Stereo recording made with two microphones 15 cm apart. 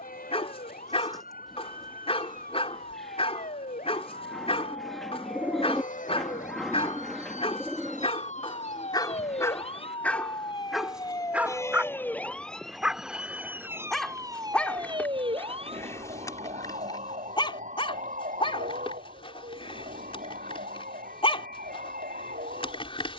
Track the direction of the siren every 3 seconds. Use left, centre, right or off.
left, left, left, left, centre, right, right, right.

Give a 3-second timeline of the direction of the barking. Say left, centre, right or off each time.
left, left, left, centre, centre, left, left, left.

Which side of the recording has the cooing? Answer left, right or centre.
centre.